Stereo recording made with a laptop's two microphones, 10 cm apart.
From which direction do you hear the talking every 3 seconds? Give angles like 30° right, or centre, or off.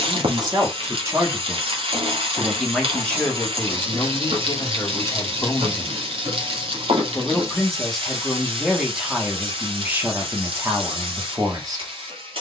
20° right, 30° left, centre, 20° right.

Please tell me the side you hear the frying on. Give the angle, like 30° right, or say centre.
80° right.